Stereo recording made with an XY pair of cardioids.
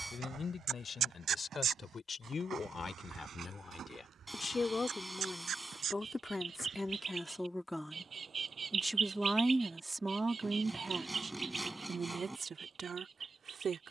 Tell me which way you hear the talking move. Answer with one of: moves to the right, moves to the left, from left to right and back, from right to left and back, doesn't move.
moves to the right.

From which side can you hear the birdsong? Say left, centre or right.
right.